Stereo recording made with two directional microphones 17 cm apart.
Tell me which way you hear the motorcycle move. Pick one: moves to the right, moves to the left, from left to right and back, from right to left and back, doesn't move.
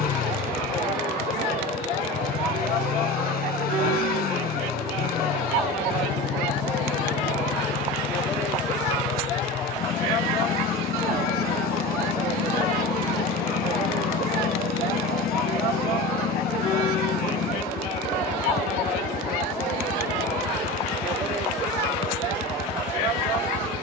doesn't move.